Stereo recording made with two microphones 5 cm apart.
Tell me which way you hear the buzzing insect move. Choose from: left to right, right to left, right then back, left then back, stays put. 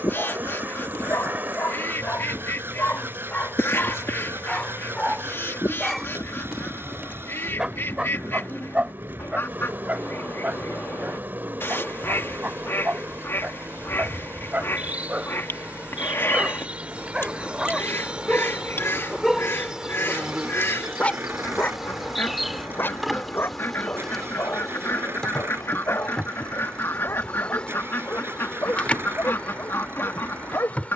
right to left.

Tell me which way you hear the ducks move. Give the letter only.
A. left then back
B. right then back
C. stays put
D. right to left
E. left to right
C.